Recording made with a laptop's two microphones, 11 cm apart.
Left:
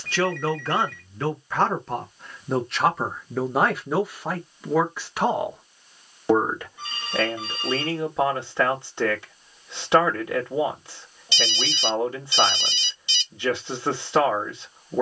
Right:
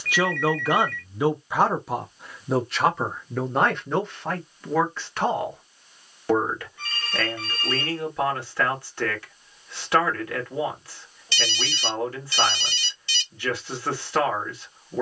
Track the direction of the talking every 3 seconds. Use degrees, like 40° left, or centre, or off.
10° right, 10° left, 20° left, 20° left, 20° left.